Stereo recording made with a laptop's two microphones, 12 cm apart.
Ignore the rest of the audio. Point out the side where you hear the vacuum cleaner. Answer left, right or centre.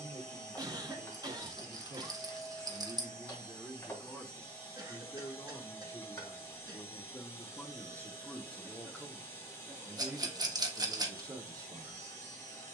left.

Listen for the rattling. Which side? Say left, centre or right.
right.